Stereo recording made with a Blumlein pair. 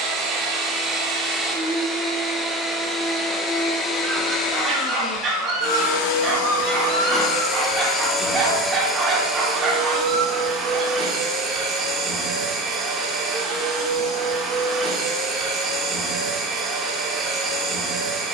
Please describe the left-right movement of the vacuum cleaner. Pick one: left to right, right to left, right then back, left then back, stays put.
left then back.